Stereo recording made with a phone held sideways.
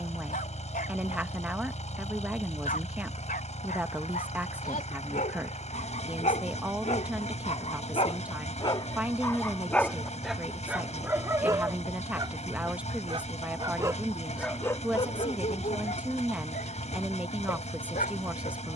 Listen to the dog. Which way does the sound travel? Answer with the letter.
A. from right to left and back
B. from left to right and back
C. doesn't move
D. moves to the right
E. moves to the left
B.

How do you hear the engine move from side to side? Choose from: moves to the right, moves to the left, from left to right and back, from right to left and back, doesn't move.
doesn't move.